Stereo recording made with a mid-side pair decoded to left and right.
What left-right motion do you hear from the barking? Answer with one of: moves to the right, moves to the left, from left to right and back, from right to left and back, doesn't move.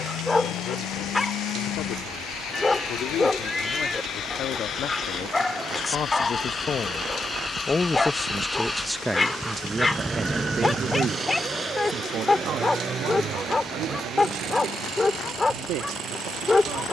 doesn't move.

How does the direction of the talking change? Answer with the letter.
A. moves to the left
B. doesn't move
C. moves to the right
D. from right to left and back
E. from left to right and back
C.